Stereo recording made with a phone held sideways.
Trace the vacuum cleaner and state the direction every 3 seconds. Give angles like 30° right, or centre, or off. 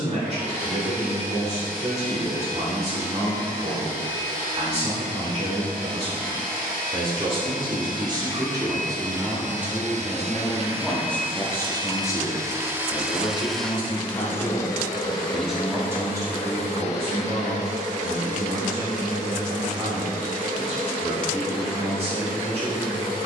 80° right, 70° right, 70° right, 50° right, centre, 40° left, 60° left, 70° left.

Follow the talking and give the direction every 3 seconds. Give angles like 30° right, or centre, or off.
40° right, 40° right, 30° right, centre, 30° left, 20° right, 40° right, 40° right.